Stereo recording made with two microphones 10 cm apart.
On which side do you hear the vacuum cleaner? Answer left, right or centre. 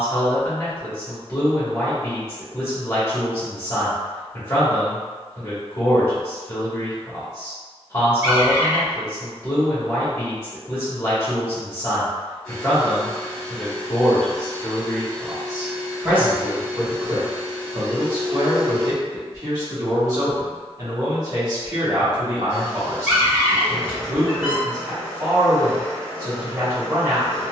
centre.